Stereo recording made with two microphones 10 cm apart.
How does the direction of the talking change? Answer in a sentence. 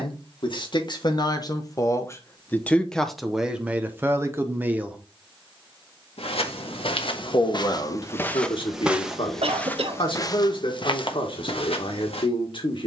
In this clip you hear the talking move from left to right and back again.